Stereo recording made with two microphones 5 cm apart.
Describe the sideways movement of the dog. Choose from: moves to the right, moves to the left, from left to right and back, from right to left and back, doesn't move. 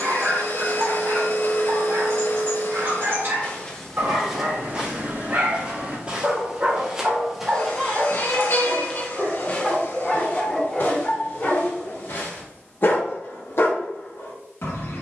moves to the left.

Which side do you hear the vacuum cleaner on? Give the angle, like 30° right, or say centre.
60° left.